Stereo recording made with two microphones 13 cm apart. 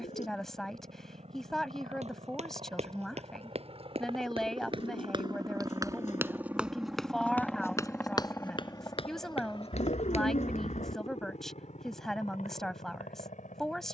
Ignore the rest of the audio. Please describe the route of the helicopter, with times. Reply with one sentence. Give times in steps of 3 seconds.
You can hear the helicopter on the right from 0 s, in the centre from 6 s and on the left from 9 s.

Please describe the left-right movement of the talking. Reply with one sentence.
In this clip you hear the talking stay in one place.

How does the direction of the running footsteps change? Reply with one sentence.
In this clip you hear the running footsteps move from right to left.